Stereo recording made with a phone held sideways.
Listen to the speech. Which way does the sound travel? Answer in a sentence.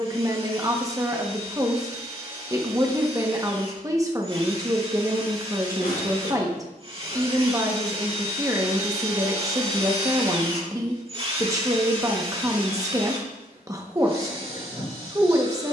In this clip you hear the speech stay in one place.